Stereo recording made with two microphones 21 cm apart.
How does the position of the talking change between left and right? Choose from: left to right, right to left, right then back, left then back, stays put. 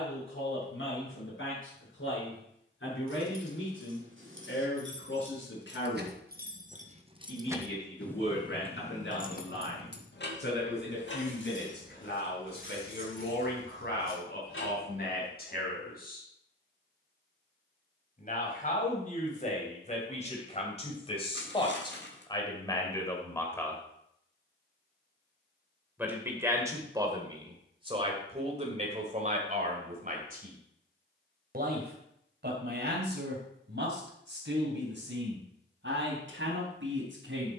left to right.